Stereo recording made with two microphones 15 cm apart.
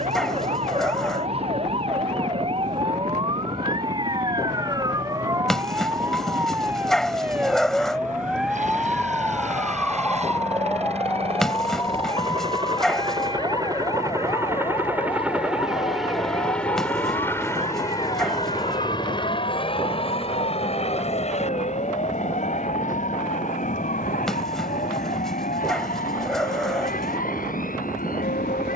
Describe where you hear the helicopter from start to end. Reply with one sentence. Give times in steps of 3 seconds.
You can hear the helicopter on the right from 0 s, in the centre from 15 s and on the left from 18 s.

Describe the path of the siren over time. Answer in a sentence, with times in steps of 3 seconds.
In this clip you hear the siren on the right from 0 s, in the centre from 6 s and on the left from 12 s.